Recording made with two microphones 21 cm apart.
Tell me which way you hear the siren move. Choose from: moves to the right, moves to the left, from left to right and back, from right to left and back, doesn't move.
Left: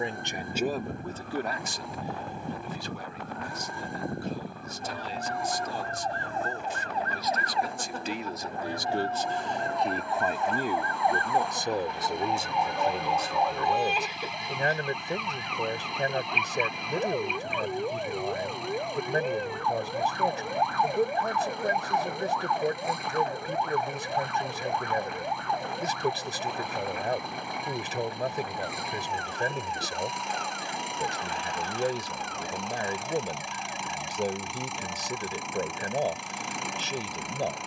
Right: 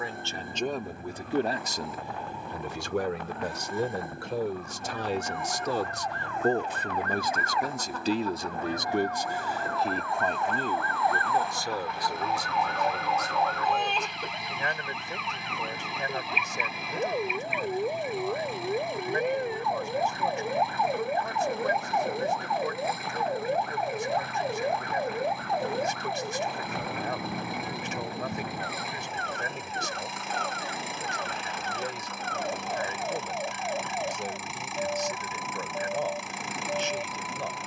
moves to the right.